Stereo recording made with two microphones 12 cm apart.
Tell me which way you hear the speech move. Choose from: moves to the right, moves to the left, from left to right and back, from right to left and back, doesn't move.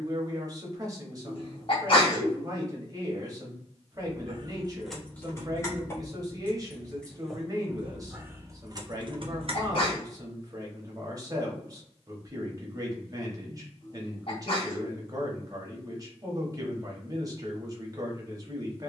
doesn't move.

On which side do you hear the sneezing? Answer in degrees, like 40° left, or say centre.
50° left.